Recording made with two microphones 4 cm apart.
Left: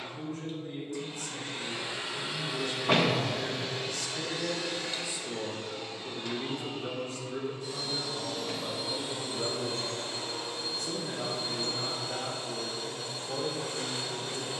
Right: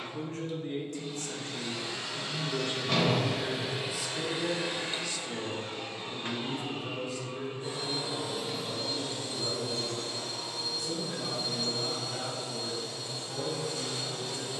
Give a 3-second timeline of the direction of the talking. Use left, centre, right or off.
right, centre, left, left, left.